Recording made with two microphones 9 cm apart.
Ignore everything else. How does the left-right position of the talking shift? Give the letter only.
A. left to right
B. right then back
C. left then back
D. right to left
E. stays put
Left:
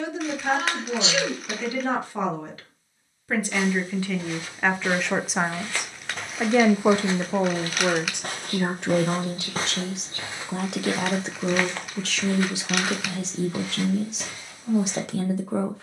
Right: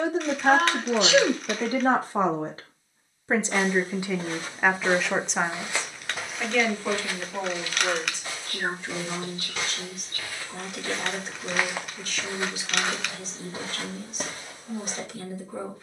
D.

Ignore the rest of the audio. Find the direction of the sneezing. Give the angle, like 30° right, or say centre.
50° right.